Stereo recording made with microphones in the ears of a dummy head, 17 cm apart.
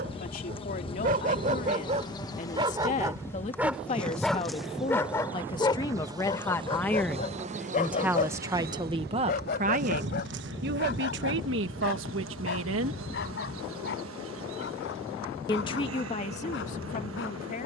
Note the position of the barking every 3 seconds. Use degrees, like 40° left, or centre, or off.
40° right, 10° left, 40° left, 50° left, 60° left, 70° left.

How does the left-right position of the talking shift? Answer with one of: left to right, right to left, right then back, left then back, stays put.
right then back.